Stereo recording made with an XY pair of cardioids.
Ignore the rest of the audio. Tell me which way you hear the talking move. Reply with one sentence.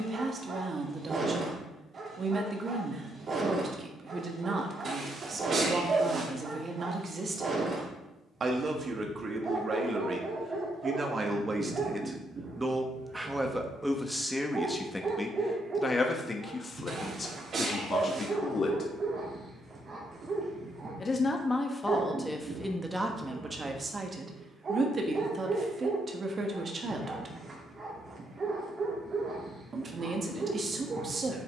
You can hear the talking go left and come back.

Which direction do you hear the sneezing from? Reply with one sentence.
In this clip you hear the sneezing on the right.